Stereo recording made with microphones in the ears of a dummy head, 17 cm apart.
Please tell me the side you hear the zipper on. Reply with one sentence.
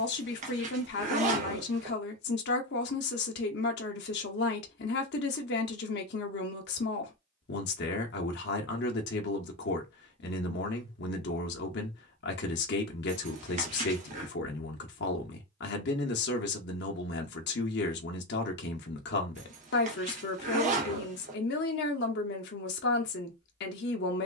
You can hear the zipper on the right.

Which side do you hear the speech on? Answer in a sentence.
In this clip you hear the speech on the left.